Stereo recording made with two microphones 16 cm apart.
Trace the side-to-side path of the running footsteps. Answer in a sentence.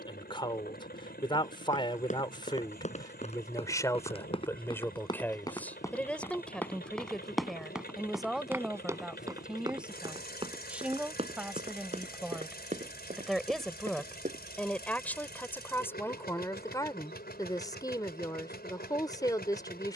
You can hear the running footsteps move to the right.